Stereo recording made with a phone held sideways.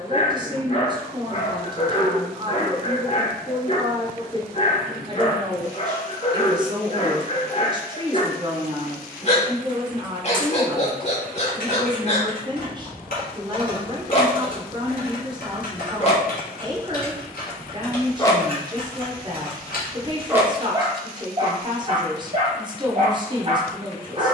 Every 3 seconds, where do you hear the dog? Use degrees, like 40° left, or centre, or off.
40° left, 40° left, 40° left, 40° left, 40° left, 40° left, centre, 40° right.